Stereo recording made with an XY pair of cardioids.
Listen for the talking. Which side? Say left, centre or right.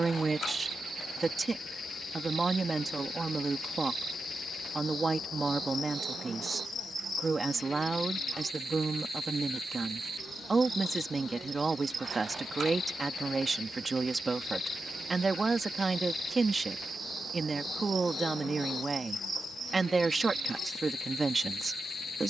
right.